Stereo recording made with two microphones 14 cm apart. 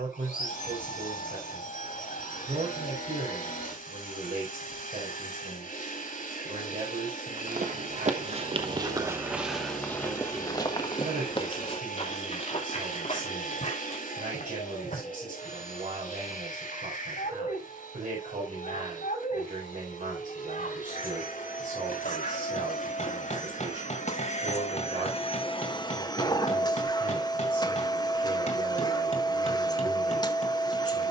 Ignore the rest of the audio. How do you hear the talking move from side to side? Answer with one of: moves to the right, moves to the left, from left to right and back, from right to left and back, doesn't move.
doesn't move.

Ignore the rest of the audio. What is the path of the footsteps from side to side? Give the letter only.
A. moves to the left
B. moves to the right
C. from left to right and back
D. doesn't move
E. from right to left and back
A.